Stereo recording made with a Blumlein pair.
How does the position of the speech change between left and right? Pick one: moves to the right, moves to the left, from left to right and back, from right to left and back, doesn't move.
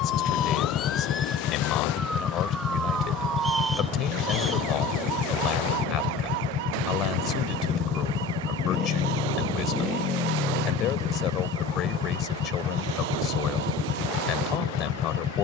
doesn't move.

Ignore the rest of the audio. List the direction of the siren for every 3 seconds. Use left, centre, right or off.
centre, right, right, right, right.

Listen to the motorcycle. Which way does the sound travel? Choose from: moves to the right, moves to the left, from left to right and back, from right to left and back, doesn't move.
doesn't move.